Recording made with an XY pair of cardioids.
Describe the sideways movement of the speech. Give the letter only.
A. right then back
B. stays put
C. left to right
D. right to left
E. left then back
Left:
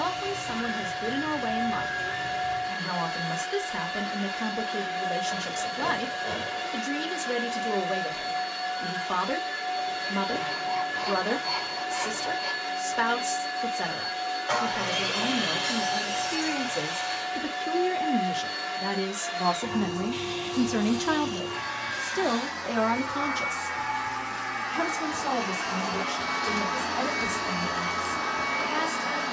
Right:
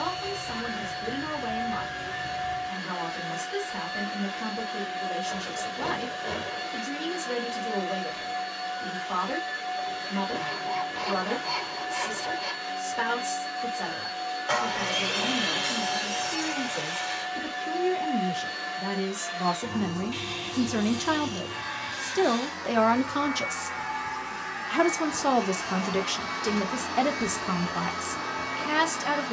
C.